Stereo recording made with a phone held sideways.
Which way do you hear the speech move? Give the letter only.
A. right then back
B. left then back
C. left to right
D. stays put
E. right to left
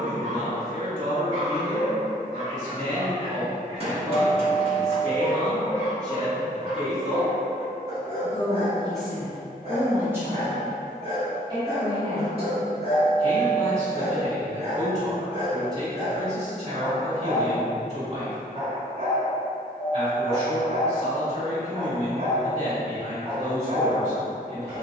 B.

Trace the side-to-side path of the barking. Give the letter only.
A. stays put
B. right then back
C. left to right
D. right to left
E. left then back
A.